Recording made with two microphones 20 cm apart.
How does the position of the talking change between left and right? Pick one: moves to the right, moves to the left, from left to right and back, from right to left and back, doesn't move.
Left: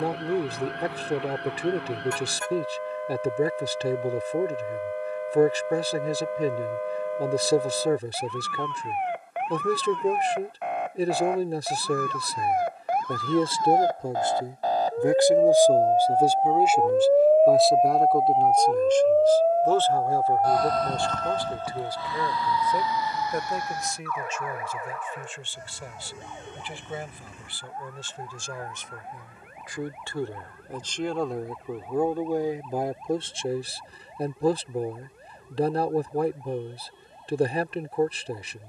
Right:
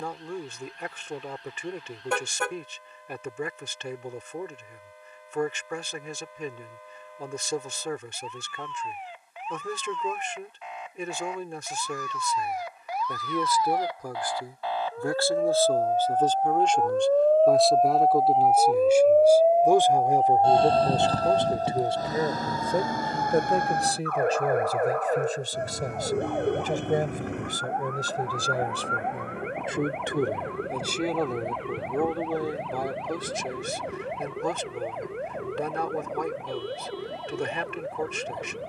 from left to right and back.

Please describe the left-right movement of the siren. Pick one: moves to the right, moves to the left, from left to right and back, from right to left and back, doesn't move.
moves to the right.